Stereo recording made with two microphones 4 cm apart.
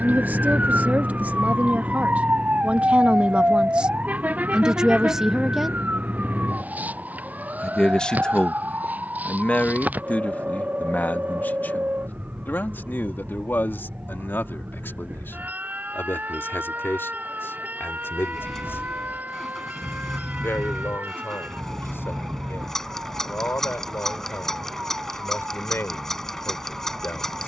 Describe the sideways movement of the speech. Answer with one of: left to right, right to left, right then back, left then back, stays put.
right to left.